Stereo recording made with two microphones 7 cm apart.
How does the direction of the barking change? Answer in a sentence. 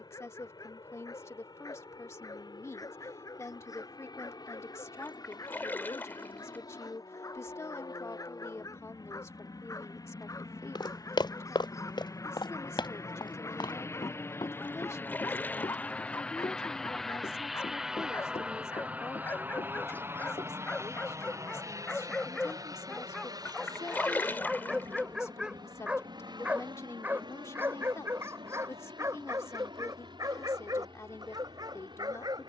You can hear the barking travel towards the right.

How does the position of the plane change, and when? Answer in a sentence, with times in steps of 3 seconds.
You can hear the plane on the left from 0 s, in the centre from 15 s and on the right from 18 s.